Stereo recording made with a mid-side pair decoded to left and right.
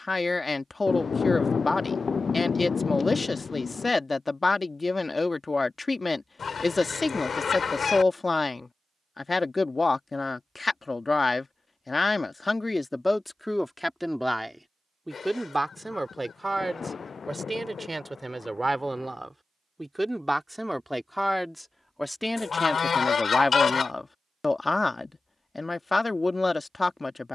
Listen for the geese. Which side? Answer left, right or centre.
left.